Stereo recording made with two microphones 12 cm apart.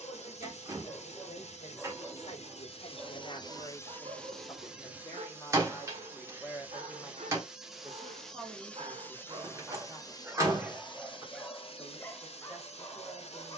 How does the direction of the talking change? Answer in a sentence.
You can hear the talking go from the left side to the right.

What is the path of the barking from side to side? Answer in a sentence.
In this clip you hear the barking go right and come back.